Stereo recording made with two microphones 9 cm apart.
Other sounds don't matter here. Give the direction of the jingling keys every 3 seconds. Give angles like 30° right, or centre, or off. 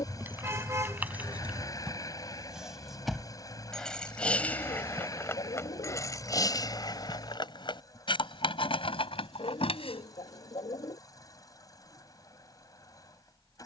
10° right, 20° left, 50° left, 70° left, off.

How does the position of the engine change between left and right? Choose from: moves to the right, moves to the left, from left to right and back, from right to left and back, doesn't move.
doesn't move.